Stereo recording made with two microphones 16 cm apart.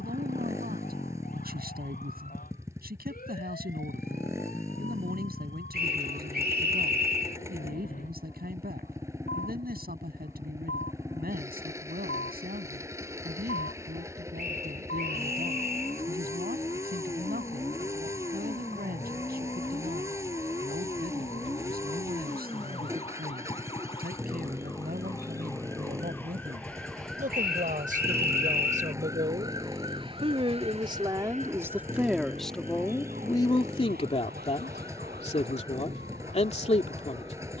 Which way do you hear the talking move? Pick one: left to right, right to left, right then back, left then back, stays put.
right to left.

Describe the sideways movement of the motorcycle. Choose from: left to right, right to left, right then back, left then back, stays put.
stays put.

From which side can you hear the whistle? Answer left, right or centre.
right.